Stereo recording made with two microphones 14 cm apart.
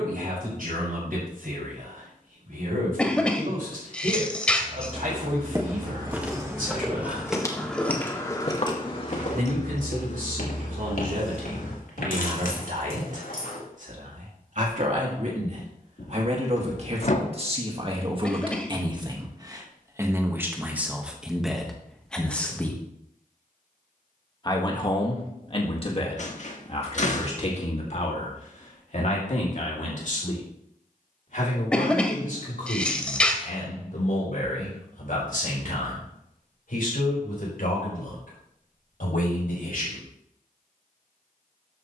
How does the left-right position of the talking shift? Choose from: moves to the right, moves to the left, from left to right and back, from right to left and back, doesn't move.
moves to the left.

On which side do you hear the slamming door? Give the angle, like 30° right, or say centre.
50° left.